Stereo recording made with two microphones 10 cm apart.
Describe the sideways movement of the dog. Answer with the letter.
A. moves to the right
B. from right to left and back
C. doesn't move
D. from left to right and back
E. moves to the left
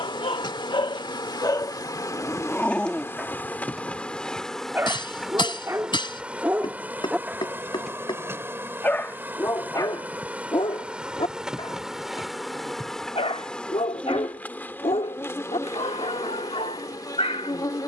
D.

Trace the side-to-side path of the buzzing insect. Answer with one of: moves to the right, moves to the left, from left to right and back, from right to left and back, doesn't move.
from left to right and back.